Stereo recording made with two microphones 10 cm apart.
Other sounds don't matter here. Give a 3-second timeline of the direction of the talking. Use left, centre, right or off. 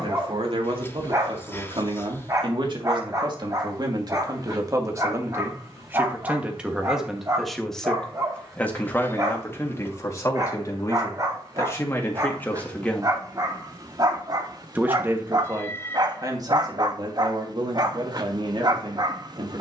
right, right, centre, left, centre, right, right.